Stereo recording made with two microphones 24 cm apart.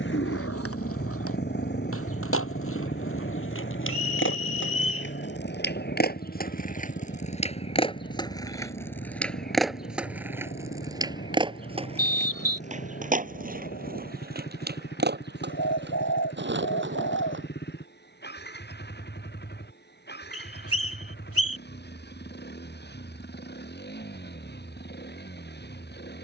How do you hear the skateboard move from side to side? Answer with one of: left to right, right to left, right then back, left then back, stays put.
left to right.